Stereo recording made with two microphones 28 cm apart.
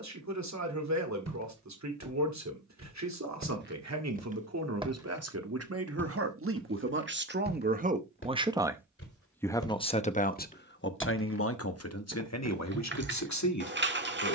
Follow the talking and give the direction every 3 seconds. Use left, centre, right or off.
right, right, right, left, left.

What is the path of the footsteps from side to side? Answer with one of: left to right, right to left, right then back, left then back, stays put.
left then back.